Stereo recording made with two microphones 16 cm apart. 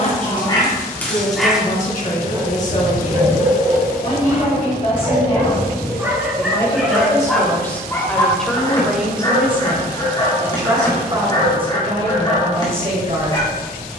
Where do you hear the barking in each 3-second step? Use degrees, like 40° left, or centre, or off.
centre, 30° right, 10° left, 30° left, 30° left.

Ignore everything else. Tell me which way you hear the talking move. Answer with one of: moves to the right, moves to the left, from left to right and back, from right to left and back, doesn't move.
moves to the right.